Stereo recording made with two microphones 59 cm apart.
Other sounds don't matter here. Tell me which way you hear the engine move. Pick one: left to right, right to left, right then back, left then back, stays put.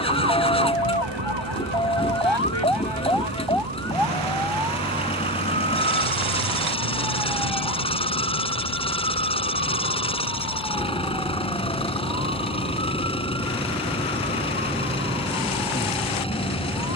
stays put.